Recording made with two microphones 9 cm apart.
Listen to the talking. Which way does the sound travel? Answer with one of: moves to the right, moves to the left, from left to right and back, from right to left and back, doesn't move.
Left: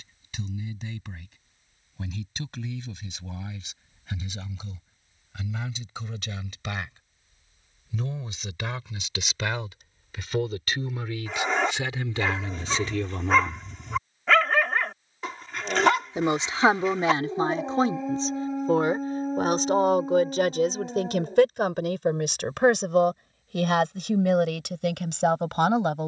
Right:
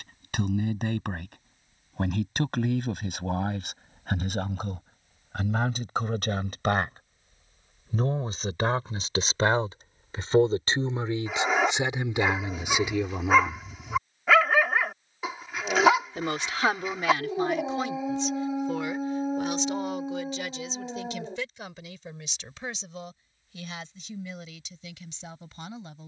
moves to the left.